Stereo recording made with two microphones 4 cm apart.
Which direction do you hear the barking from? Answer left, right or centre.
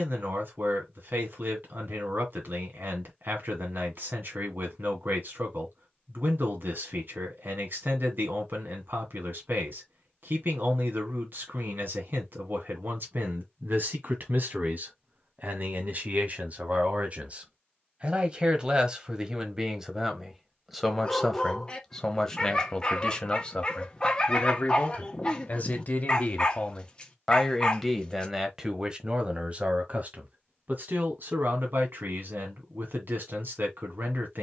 left.